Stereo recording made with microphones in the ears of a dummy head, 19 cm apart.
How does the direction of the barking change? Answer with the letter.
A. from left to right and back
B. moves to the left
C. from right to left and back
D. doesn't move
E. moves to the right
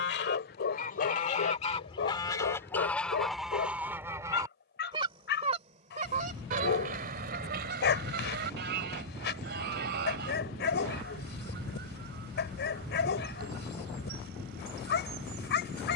D.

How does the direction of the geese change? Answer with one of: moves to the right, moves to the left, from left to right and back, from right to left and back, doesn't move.
moves to the right.